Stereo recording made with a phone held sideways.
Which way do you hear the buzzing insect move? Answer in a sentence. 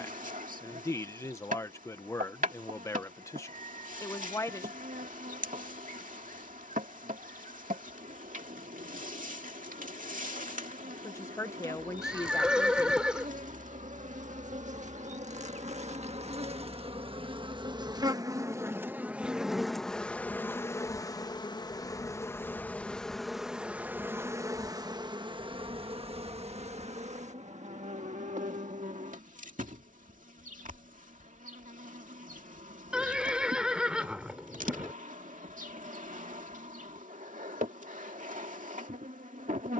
In this clip you hear the buzzing insect go left and come back.